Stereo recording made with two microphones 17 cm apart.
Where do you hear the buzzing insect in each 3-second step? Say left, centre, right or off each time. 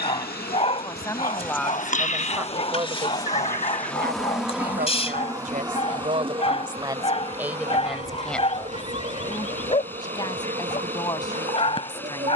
left, centre, right, right.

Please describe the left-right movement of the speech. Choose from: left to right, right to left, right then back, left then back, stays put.
right then back.